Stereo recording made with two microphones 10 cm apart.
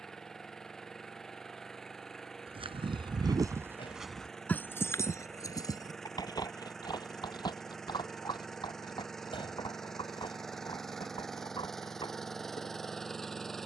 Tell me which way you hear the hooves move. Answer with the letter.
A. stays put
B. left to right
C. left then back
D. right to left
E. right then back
D.